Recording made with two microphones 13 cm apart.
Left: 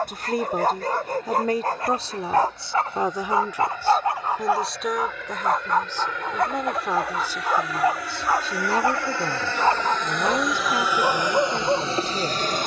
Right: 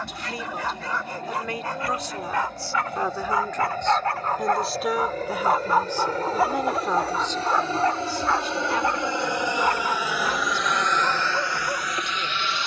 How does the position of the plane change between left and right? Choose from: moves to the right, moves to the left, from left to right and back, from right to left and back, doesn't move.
moves to the left.